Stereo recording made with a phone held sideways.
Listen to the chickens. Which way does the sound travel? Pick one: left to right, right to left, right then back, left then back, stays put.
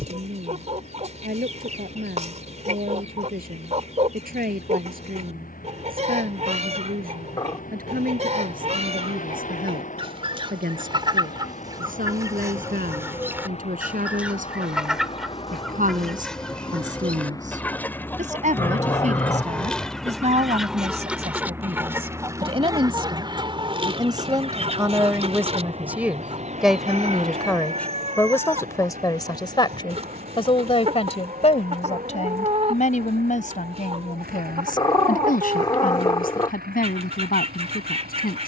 left then back.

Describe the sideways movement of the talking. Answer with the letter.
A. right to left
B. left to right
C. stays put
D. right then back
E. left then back
A.